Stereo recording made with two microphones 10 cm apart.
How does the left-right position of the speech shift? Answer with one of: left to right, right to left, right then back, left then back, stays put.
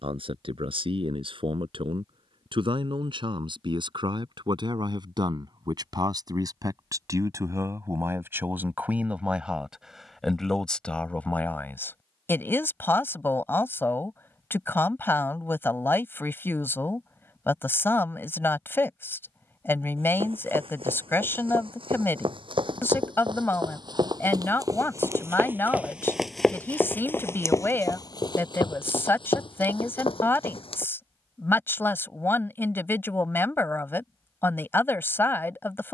right to left.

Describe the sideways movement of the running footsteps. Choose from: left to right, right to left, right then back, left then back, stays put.
right to left.